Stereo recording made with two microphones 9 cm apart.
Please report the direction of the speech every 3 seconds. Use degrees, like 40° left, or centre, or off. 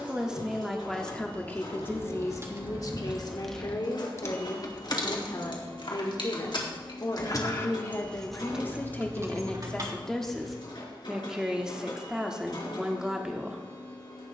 20° left, 50° left, 40° left, centre, 10° right.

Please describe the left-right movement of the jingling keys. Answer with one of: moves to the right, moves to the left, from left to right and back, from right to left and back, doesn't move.
from right to left and back.